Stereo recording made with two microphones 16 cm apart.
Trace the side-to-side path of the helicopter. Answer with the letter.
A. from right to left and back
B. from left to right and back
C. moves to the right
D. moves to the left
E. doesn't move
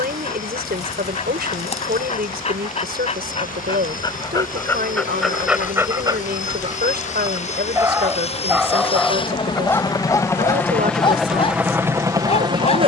C.